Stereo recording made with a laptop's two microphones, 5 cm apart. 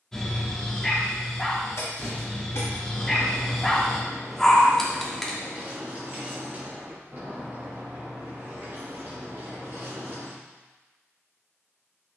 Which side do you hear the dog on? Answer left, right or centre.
centre.